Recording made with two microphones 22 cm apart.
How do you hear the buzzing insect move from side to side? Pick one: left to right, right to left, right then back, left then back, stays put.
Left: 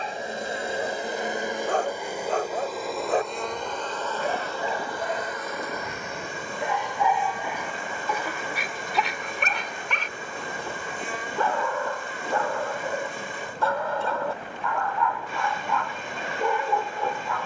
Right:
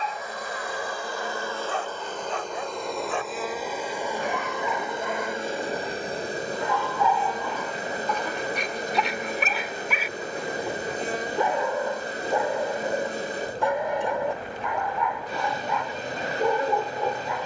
left to right.